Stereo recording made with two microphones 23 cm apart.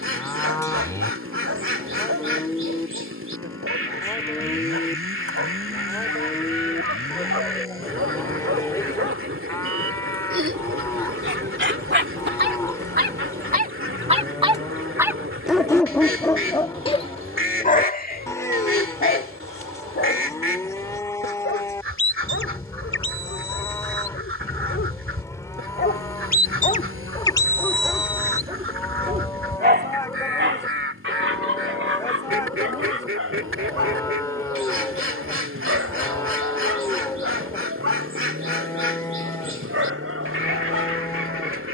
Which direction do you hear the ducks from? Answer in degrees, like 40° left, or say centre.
60° right.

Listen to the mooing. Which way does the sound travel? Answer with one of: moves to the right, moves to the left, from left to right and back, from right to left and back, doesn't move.
doesn't move.